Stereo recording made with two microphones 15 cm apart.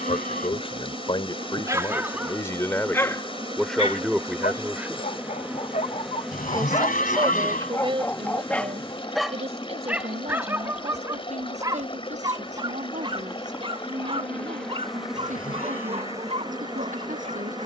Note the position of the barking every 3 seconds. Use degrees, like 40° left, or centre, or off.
10° right, 50° left, 20° left, 20° right, 30° right, 40° right.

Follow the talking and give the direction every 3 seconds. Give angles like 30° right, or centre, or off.
30° left, centre, 30° right, 50° right, 50° right, 60° right.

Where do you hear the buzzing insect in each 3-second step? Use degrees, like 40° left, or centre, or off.
40° right, 20° right, 10° left, 30° left, 20° left, 20° right.